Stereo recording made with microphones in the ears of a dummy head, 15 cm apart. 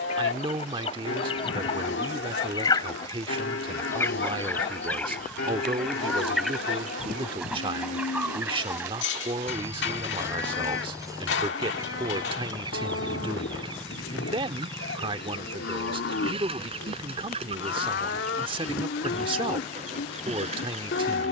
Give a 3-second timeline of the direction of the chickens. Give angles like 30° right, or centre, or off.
30° left, 10° left, centre, 20° right, 30° right, 30° right, 40° right.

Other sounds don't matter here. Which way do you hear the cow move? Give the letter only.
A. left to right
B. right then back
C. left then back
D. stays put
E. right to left
D.